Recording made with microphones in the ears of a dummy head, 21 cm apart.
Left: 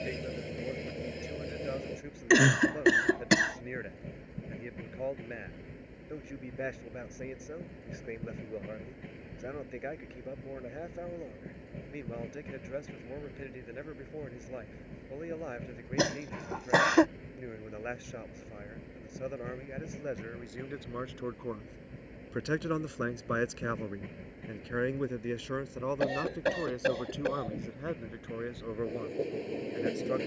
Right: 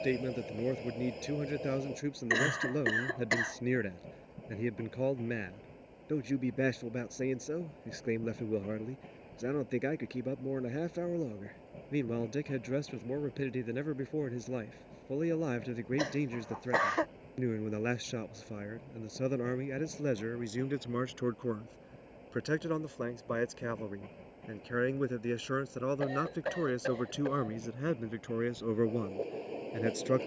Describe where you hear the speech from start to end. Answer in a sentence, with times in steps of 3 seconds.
In this clip you hear the speech on the right from 0 s, in the centre from 21 s and on the right from 27 s.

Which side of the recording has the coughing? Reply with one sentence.
In this clip you hear the coughing on the left.